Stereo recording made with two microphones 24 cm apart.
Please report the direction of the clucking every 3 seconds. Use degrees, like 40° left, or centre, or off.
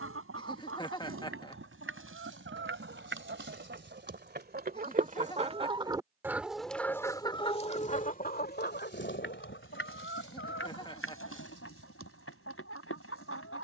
60° right, 40° right, 20° left, 60° left, 70° left.